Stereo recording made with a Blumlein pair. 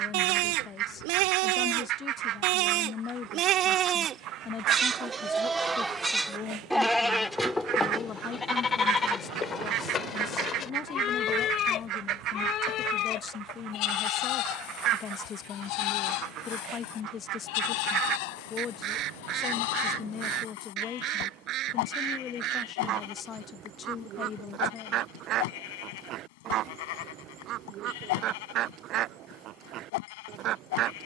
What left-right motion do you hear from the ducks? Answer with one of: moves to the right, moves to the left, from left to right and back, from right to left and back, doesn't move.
doesn't move.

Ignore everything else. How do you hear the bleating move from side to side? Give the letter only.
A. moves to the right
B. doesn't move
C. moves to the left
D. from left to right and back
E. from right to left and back
C.